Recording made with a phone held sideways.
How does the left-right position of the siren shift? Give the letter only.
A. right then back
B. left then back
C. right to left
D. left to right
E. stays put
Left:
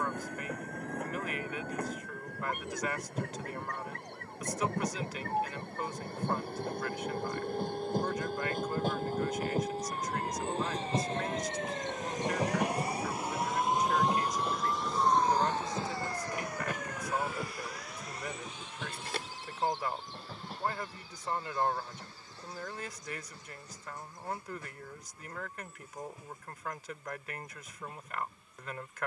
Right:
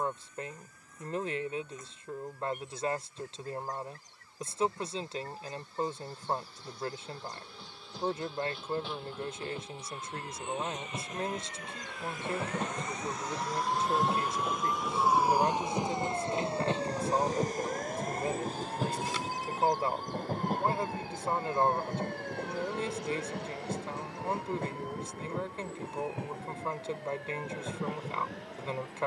D.